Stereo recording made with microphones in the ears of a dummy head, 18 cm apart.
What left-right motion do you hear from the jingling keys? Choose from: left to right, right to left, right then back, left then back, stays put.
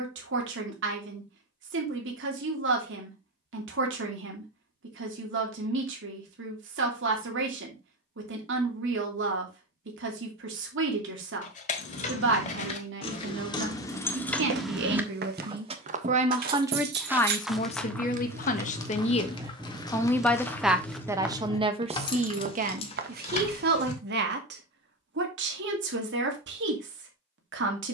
right then back.